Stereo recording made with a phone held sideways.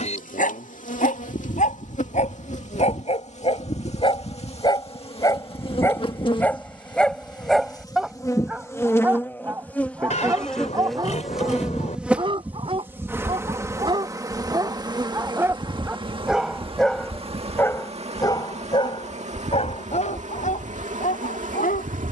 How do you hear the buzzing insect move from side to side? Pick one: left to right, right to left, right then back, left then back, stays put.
left to right.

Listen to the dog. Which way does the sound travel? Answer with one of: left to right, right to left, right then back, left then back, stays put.
right then back.